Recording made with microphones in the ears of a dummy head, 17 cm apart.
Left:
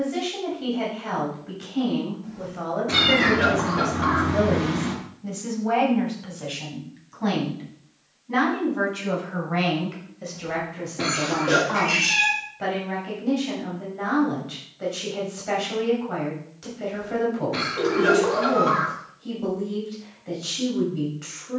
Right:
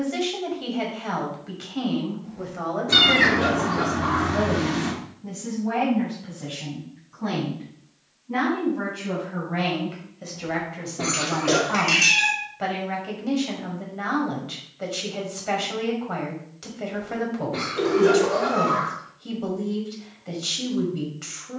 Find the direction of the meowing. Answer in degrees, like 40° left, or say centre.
60° right.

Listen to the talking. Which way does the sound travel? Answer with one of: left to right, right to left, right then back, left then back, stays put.
left then back.